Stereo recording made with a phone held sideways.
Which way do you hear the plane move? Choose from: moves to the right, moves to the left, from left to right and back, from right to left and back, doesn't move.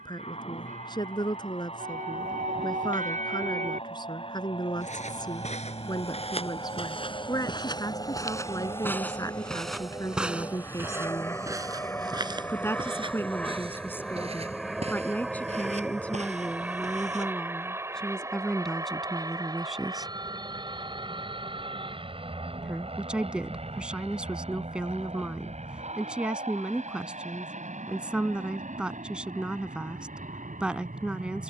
moves to the right.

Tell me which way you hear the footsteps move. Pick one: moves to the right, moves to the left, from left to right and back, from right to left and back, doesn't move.
moves to the right.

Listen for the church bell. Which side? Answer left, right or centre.
right.